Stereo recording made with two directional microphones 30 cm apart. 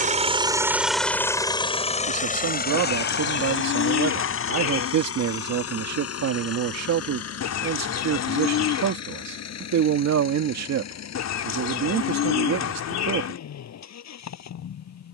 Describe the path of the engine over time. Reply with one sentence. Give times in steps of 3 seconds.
In this clip you hear the engine in the centre from 0 s and on the left from 3 s.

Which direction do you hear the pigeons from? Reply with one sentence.
In this clip you hear the pigeons on the left.